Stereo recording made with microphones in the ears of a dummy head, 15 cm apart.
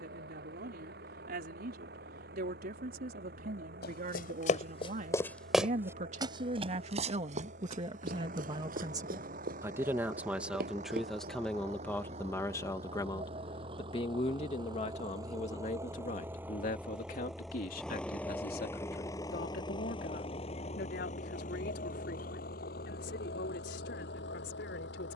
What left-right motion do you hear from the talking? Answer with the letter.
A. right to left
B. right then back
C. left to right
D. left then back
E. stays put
A.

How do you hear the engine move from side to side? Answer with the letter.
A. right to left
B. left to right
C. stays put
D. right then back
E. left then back
A.